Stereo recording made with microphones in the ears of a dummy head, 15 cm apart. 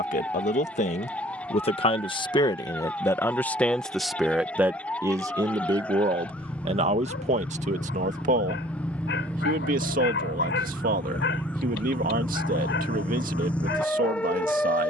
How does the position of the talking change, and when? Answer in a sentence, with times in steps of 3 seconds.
You can hear the talking on the left from 0 s, in the centre from 3 s and on the right from 6 s.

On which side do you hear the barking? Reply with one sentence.
You can hear the barking on the left.